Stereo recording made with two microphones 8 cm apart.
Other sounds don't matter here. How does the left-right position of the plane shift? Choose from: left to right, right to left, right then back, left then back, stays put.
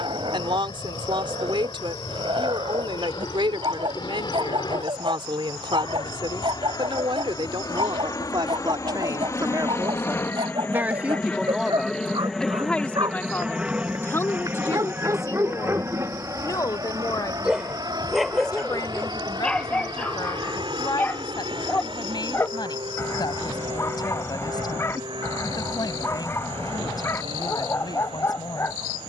left to right.